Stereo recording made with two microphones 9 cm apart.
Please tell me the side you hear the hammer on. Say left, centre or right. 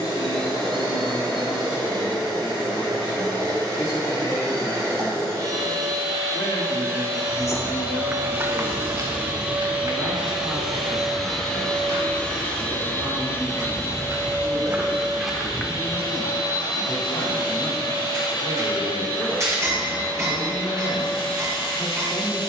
right.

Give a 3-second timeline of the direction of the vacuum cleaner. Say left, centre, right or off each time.
right, right, right, centre, left, left, left, left.